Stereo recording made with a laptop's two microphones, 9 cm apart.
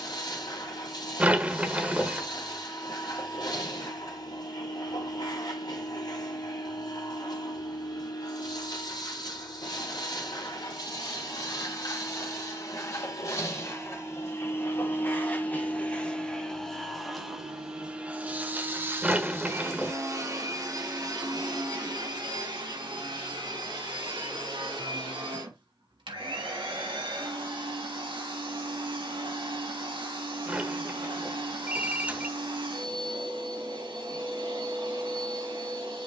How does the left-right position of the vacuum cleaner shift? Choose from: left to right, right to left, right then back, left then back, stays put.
left to right.